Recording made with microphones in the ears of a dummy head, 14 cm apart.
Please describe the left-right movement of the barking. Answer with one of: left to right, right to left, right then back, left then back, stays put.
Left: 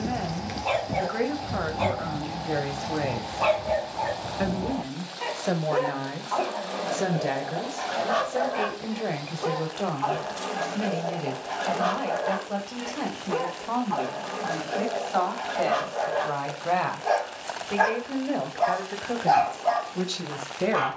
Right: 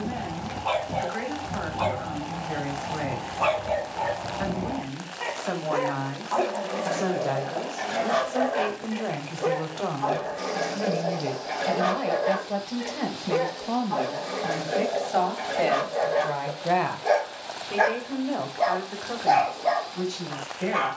left to right.